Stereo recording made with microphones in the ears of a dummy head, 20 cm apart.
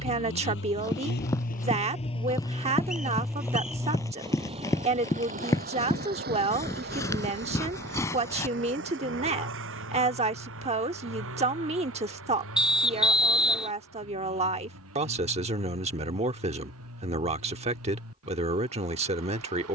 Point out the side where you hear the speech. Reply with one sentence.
In this clip you hear the speech on the right.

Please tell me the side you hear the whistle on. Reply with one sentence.
You can hear the whistle in the centre.